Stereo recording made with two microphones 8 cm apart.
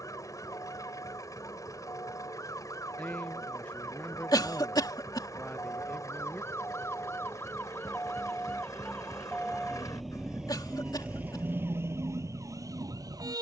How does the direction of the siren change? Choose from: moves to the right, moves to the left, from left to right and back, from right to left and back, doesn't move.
moves to the right.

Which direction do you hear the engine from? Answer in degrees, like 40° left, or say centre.
50° left.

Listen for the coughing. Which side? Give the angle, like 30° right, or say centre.
70° left.